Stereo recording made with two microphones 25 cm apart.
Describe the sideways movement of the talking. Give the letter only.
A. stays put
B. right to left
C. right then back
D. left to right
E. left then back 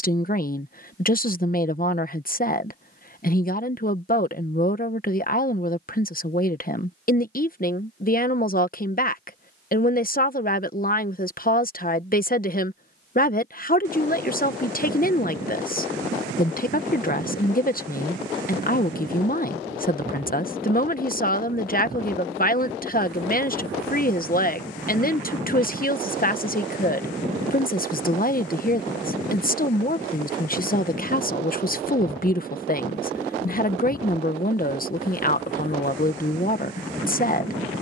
A.